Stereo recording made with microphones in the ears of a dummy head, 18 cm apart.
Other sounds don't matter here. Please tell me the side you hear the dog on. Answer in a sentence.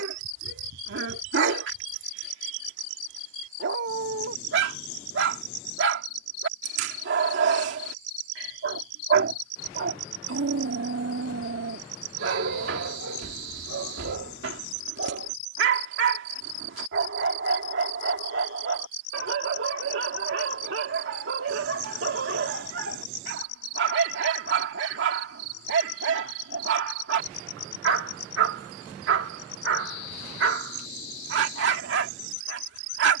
In this clip you hear the dog on the right.